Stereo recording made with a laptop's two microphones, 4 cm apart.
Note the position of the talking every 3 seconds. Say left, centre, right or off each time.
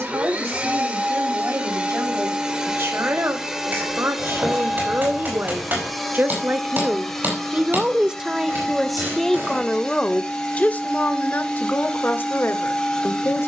right, right, right, left, left.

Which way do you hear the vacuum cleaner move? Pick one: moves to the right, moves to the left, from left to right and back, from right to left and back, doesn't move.
moves to the left.